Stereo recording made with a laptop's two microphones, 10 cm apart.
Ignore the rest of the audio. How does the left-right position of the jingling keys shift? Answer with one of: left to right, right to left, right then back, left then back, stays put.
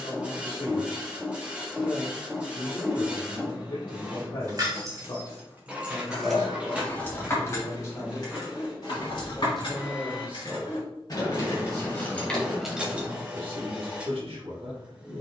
left then back.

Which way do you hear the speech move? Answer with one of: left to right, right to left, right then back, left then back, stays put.
left to right.